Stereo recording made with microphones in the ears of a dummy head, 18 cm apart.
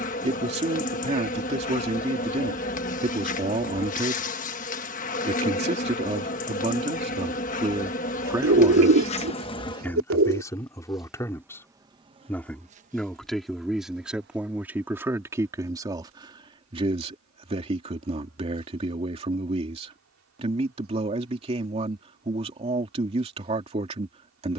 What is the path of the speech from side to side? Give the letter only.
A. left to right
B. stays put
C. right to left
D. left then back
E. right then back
D.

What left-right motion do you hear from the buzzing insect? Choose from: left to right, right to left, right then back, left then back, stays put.
left to right.